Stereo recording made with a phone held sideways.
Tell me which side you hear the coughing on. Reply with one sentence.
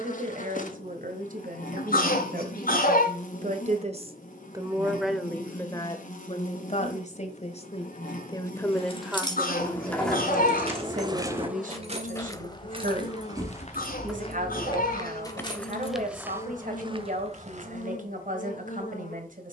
You can hear the coughing on the left.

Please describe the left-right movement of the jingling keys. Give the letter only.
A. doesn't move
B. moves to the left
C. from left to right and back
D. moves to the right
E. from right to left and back
C.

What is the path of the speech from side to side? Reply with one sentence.
You can hear the speech move from right to left and back again.